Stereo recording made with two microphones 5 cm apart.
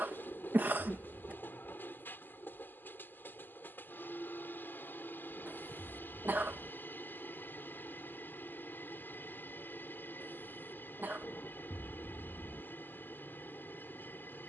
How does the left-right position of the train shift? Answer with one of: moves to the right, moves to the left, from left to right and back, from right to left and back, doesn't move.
doesn't move.